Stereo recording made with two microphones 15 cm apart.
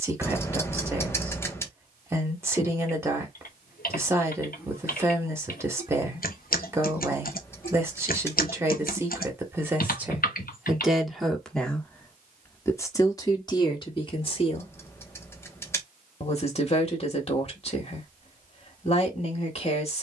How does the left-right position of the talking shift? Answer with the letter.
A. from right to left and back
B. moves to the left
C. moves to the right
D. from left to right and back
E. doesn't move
B.